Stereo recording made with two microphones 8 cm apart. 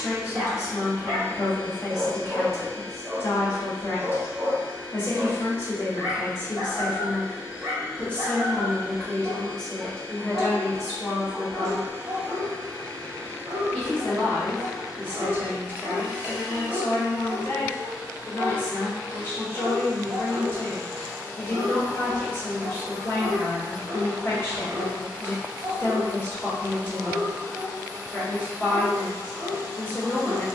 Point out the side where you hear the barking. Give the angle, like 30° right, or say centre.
50° right.